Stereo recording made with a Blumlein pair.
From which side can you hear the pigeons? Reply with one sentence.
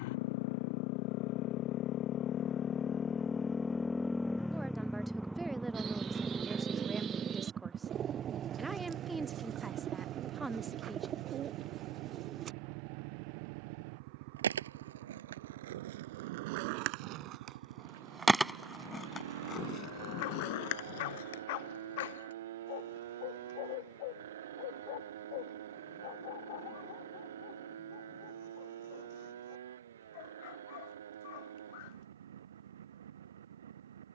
In this clip you hear the pigeons on the right.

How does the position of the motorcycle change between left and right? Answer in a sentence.
You can hear the motorcycle travel towards the right.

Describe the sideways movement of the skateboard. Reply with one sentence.
You can hear the skateboard move to the left.